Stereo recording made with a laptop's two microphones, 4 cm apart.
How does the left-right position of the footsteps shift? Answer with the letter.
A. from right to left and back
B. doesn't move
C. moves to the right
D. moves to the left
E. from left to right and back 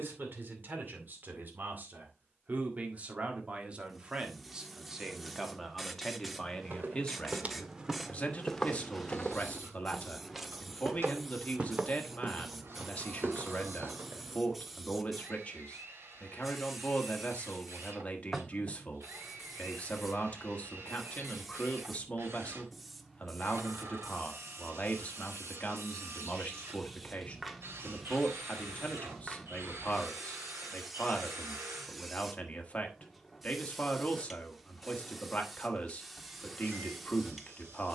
A.